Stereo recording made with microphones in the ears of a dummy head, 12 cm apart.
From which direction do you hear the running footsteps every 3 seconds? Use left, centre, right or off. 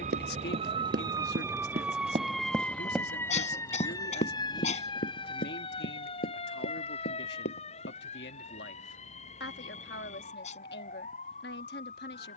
right, left, left, off.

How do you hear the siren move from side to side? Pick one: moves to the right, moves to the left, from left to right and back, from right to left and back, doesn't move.
moves to the left.